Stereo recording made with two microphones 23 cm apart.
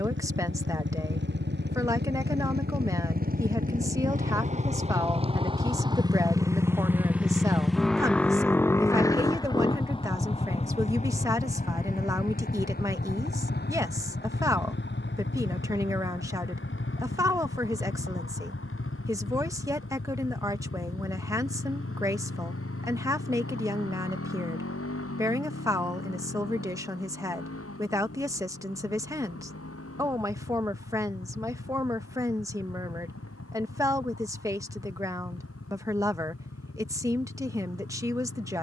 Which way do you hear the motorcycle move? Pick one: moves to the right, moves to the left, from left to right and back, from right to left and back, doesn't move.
moves to the left.